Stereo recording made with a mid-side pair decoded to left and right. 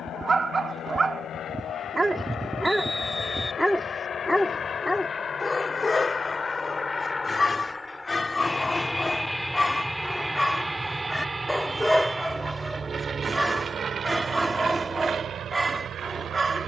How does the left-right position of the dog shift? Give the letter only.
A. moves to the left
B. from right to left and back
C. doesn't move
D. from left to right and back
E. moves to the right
B.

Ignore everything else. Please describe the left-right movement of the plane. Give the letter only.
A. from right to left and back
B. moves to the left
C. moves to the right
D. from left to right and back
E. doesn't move
C.